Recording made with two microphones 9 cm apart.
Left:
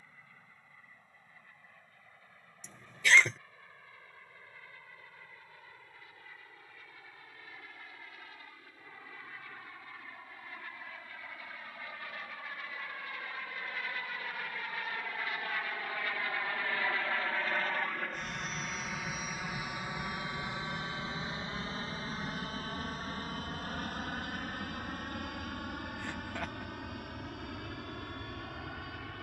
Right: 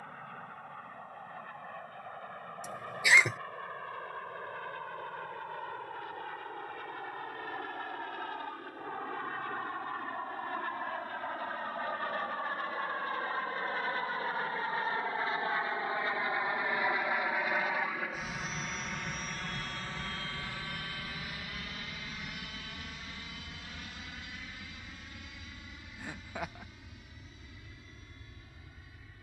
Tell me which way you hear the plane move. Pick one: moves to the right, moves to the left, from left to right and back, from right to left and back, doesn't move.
moves to the left.